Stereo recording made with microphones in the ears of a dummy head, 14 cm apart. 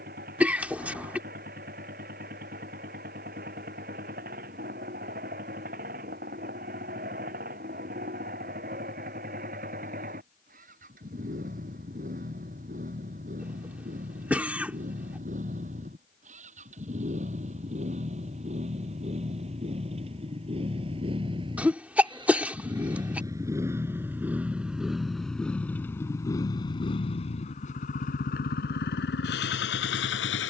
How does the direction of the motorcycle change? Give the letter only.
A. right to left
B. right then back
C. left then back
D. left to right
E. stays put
A.